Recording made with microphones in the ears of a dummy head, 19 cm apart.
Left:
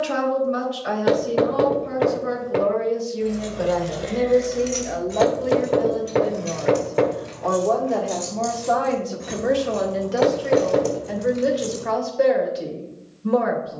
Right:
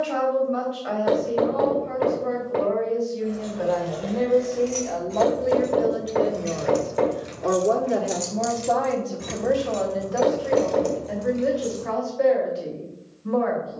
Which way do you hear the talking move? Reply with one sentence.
You can hear the talking go right and come back.